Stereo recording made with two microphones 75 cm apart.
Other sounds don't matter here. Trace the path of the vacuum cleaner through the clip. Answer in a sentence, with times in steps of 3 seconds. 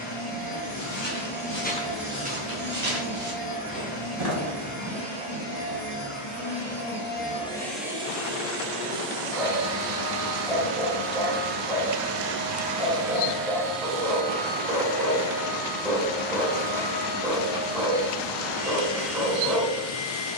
In this clip you hear the vacuum cleaner on the left from 0 s, in the centre from 6 s, on the right from 9 s, in the centre from 12 s and on the left from 15 s.